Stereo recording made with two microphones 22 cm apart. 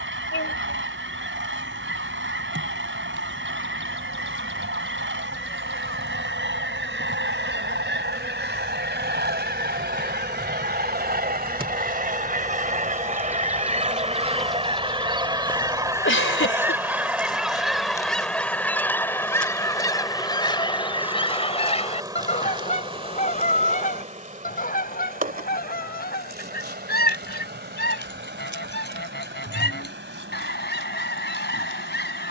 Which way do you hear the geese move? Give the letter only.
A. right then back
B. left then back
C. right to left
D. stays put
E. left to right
C.